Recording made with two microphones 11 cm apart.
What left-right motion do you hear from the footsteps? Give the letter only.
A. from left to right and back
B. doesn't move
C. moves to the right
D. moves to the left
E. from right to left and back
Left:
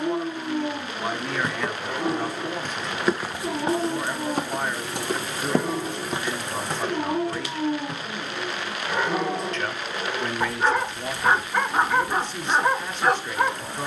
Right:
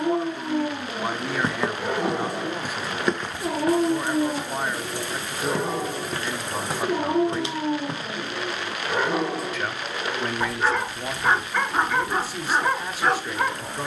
E.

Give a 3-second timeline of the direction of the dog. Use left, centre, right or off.
right, right, right, centre, centre.